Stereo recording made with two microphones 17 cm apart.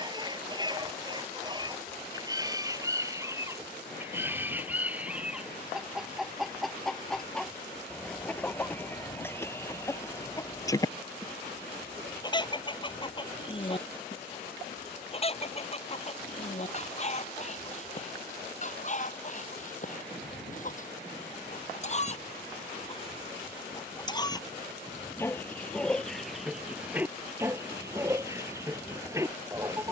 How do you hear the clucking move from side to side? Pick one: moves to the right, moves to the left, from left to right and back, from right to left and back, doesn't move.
from right to left and back.